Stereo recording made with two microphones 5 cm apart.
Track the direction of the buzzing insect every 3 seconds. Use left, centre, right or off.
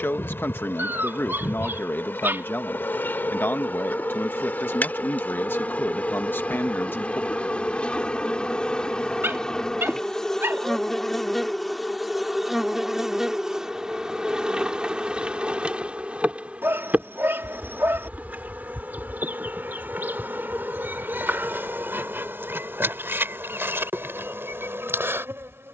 left, left, left, centre, centre, right, right, right, right.